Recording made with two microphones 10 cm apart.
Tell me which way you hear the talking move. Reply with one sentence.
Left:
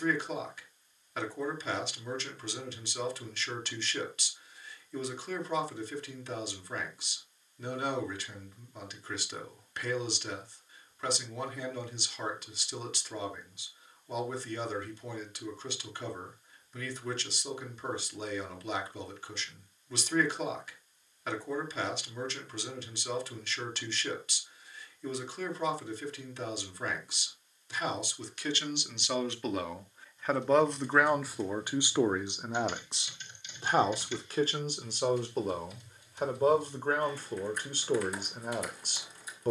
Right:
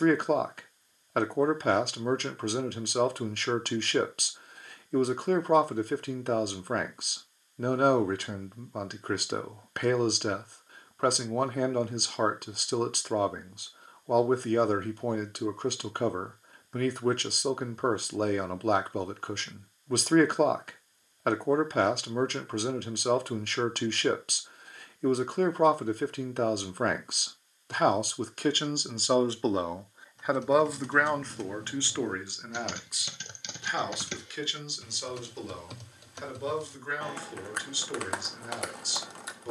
In this clip you hear the talking travel towards the left.